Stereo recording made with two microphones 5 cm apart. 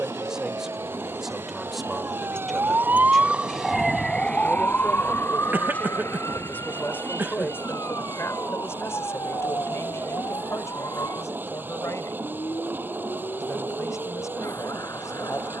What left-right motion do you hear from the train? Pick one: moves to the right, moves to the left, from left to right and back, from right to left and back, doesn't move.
doesn't move.